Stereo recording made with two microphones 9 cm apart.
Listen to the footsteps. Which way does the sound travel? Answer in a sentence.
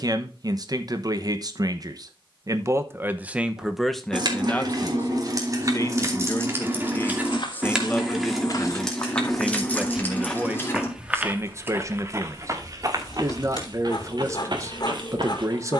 In this clip you hear the footsteps move from left to right.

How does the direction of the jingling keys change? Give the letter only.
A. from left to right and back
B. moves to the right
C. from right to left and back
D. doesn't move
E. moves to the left
E.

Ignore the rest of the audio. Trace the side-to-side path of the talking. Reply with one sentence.
You can hear the talking go left and come back.